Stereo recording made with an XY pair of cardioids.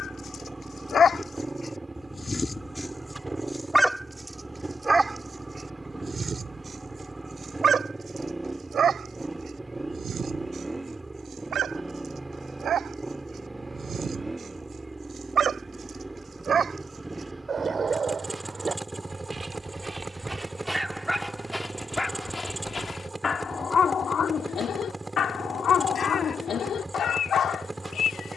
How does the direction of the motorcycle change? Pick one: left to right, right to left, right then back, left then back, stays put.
stays put.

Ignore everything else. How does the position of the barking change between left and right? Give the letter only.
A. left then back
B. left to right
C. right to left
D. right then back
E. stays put
D.